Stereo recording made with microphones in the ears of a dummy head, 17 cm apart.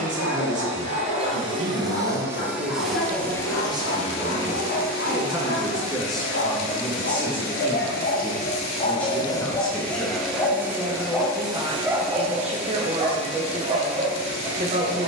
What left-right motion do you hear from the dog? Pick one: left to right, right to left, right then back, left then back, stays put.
left to right.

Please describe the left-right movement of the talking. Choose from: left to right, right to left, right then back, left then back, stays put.
left then back.